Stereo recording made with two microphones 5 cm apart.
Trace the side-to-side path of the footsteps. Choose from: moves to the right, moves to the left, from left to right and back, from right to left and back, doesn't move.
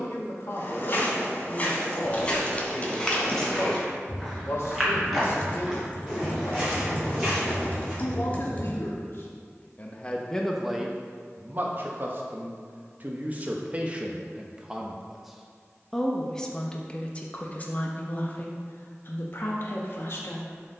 moves to the right.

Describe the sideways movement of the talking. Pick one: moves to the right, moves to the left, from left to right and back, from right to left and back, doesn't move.
from left to right and back.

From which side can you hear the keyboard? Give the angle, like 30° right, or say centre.
30° left.